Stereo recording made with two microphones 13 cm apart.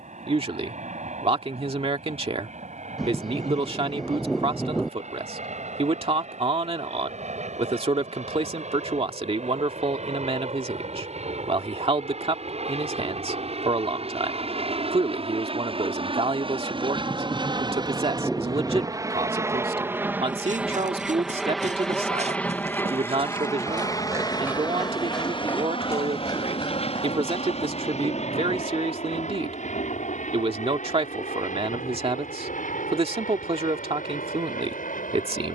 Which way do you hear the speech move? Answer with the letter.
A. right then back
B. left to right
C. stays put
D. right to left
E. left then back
C.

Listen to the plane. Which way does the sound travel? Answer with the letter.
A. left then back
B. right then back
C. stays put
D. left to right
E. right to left
E.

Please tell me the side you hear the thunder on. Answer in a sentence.
You can hear the thunder in the centre.